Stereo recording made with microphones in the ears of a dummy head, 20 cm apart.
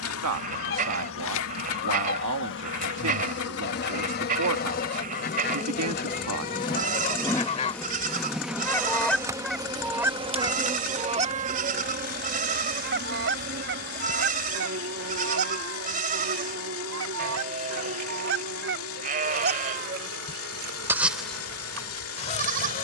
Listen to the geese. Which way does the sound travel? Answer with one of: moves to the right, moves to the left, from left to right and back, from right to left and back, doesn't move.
from left to right and back.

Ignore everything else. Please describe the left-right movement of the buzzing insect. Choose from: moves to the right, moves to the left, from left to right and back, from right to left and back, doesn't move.
moves to the right.